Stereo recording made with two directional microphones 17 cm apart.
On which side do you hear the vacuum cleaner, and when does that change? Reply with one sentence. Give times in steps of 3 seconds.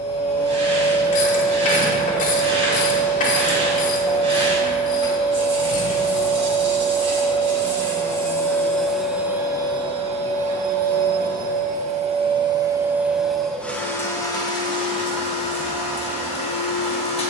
In this clip you hear the vacuum cleaner on the left from 0 s, on the right from 9 s, in the centre from 12 s and on the left from 15 s.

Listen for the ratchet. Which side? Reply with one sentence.
In this clip you hear the ratchet on the left.